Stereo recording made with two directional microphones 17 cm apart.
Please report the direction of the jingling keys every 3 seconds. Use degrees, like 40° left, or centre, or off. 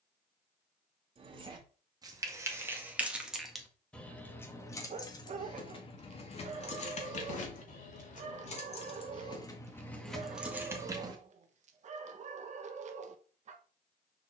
20° right, 10° left, 40° left, centre, off.